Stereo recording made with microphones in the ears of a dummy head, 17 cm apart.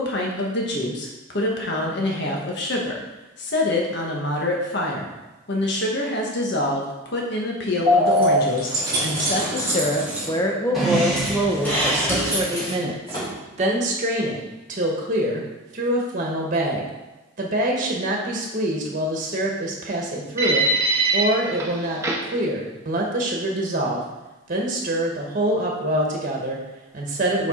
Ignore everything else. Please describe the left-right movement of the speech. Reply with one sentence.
You can hear the speech travel towards the right.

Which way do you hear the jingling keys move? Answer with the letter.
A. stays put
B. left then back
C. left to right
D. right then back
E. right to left
E.